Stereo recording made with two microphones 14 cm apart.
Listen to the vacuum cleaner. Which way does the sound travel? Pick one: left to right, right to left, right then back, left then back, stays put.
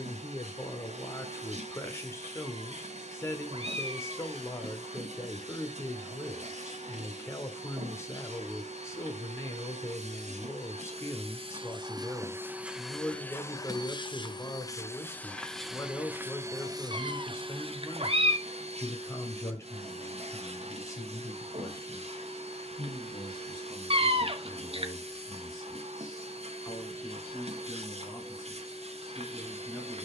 left then back.